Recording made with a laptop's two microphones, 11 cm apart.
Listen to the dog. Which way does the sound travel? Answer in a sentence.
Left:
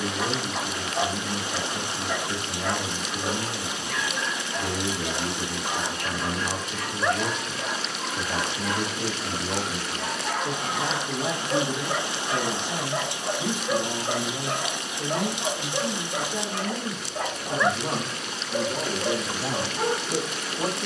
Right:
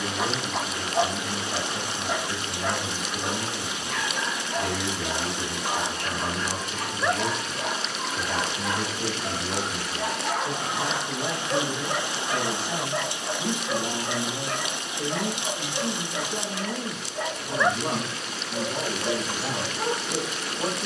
You can hear the dog travel towards the left.